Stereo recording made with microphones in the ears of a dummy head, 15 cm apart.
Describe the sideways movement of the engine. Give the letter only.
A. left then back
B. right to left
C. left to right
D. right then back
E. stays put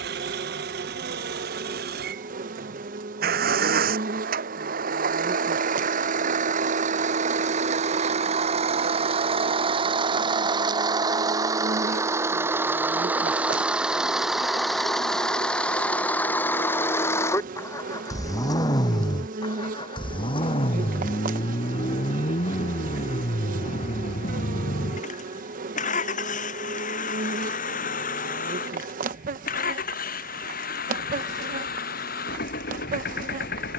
B.